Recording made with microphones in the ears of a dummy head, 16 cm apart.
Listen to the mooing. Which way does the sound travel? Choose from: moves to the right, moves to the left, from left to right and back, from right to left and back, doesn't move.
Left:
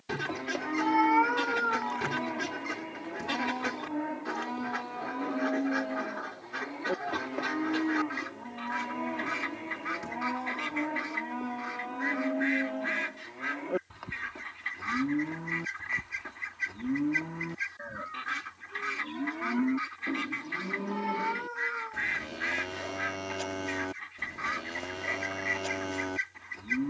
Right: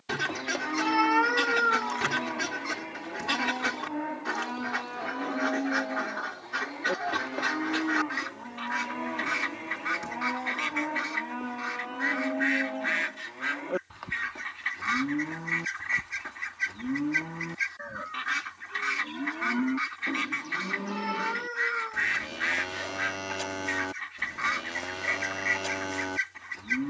doesn't move.